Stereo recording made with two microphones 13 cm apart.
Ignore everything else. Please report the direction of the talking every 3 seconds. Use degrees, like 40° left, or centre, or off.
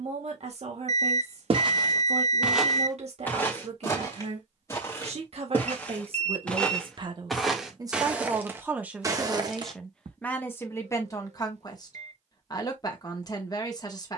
60° right, 60° right, 30° right, 10° left, 30° left.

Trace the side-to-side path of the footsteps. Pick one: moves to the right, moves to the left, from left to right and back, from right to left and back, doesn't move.
from right to left and back.